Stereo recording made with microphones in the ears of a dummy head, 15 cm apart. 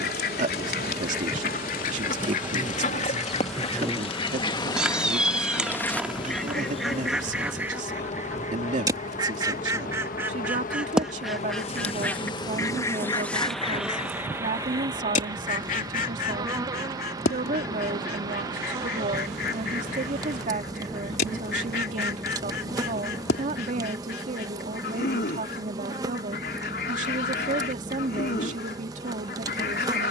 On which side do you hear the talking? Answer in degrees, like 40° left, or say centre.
50° right.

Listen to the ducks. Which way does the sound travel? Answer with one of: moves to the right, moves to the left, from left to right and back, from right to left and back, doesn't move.
from left to right and back.